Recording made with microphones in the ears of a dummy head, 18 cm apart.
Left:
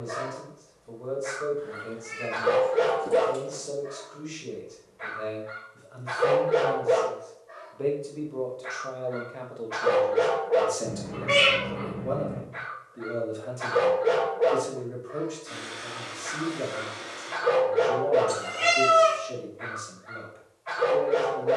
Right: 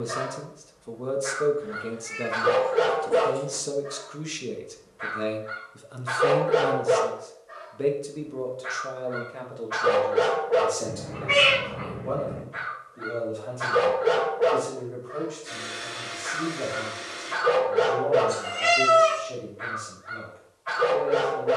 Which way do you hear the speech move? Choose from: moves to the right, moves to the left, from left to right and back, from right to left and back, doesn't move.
moves to the left.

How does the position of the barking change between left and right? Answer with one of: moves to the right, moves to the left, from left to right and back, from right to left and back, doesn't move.
doesn't move.